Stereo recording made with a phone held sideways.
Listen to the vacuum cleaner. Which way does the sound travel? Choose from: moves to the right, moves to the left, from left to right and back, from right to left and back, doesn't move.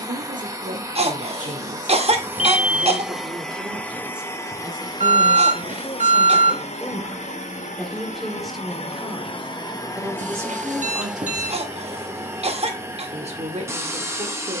from right to left and back.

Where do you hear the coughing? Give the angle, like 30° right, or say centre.
40° right.